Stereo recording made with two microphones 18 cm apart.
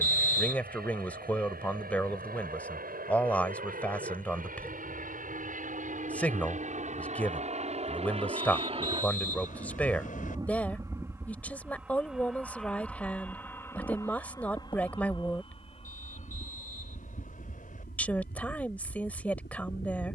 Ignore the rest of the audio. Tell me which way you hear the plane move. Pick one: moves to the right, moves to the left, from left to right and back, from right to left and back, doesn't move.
moves to the left.